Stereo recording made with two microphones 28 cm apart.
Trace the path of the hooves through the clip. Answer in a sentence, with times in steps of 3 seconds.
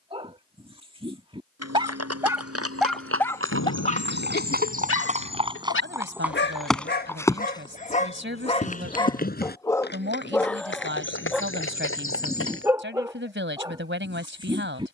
You can hear the hooves on the right from 0 s, in the centre from 6 s and on the left from 9 s.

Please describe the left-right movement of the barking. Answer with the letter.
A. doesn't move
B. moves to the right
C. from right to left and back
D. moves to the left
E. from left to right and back
C.